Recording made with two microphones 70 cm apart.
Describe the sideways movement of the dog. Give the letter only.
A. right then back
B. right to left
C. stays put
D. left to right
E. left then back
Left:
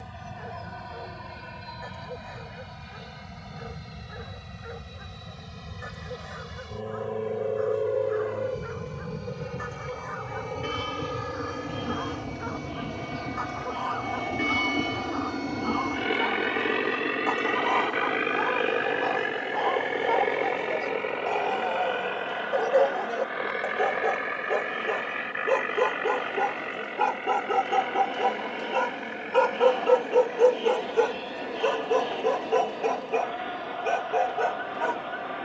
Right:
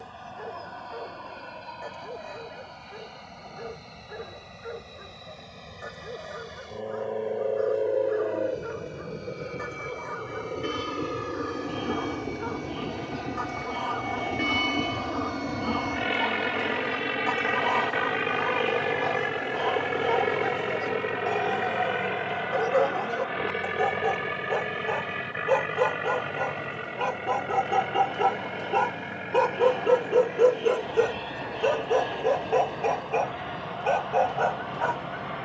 B.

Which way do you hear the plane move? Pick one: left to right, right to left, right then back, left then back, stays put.
left to right.